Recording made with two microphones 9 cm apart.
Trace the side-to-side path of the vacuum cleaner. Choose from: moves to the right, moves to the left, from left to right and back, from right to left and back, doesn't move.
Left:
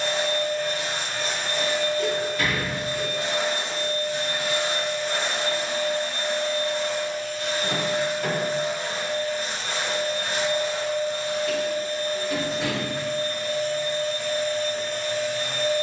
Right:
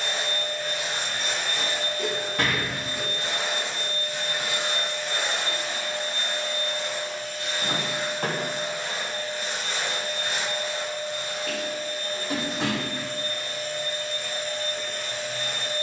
doesn't move.